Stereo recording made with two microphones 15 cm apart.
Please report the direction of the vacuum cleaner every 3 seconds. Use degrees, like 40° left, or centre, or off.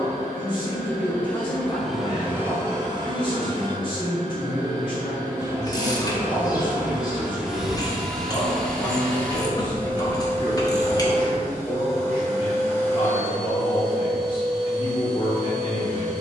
centre, 30° right, centre, 20° left, 20° left, 20° left.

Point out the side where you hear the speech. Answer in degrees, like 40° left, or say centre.
30° left.